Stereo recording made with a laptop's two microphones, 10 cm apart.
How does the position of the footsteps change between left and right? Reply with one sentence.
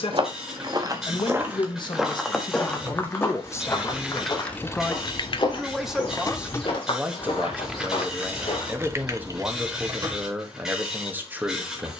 In this clip you hear the footsteps go from the right side to the left.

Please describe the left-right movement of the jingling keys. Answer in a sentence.
You can hear the jingling keys go left and come back.